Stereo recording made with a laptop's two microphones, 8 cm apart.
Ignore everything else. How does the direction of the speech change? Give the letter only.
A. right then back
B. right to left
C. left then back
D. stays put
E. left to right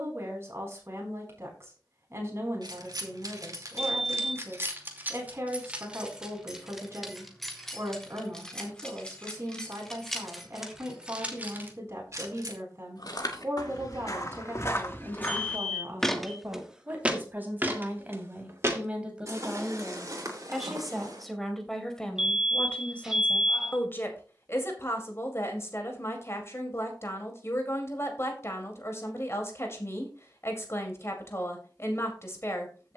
B.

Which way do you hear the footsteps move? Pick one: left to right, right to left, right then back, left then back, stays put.
left to right.